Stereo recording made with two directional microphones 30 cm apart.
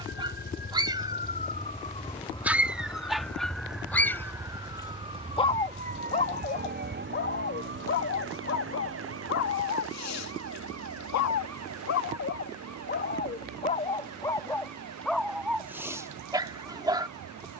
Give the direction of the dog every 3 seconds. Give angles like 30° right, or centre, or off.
10° right, 10° left, 40° left, 60° left, 30° left, 10° right.